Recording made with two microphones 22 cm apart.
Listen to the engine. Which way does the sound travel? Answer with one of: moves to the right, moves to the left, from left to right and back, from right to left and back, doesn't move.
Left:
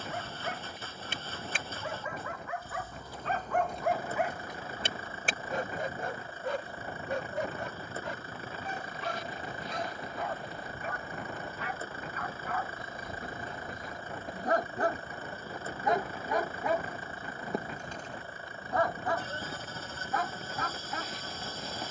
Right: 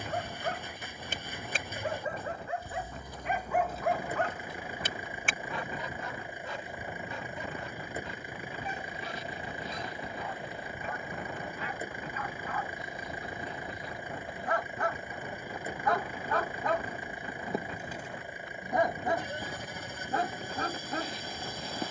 doesn't move.